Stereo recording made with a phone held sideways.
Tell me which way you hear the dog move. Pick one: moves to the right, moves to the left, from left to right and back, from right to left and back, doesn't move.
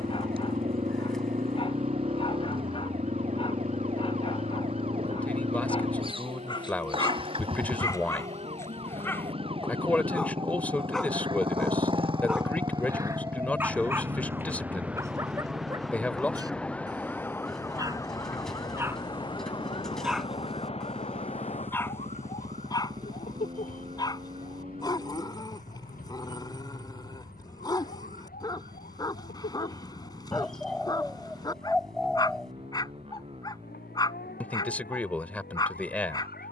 from left to right and back.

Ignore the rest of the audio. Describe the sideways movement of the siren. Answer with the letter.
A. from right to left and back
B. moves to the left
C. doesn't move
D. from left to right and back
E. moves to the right
B.